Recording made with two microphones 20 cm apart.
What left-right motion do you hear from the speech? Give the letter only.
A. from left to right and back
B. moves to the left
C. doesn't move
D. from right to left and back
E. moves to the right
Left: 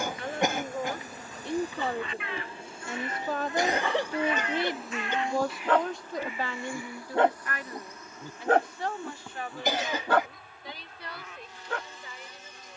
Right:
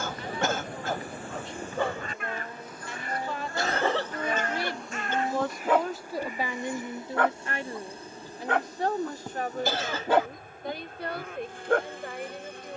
E.